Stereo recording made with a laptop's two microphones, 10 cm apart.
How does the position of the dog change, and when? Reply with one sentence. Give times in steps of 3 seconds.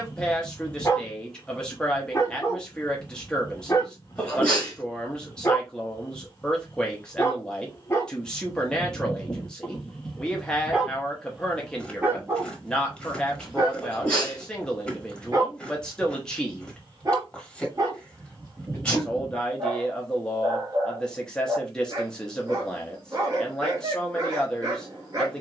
In this clip you hear the dog on the left from 0 s, in the centre from 9 s and on the right from 12 s.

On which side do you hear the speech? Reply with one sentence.
In this clip you hear the speech in the centre.